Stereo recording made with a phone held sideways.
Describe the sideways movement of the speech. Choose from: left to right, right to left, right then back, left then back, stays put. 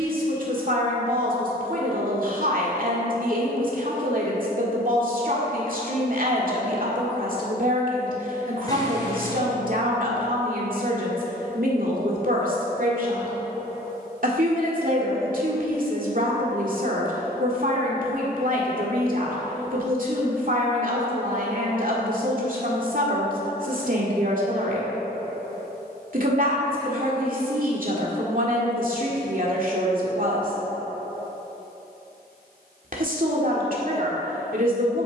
stays put.